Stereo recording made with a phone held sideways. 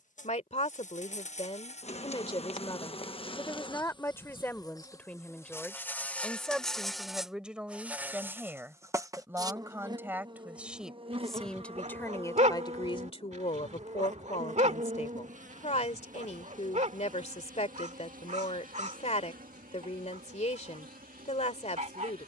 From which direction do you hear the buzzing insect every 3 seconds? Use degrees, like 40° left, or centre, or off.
50° left, 30° left, centre, 30° right, 50° right, 60° right, 60° right, 70° right.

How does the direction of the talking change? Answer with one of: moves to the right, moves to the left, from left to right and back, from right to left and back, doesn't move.
from left to right and back.